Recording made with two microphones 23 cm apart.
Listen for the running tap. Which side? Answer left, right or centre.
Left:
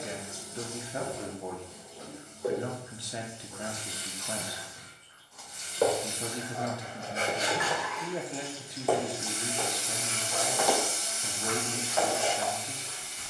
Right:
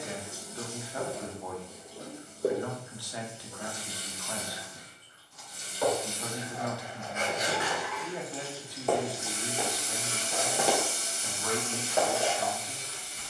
right.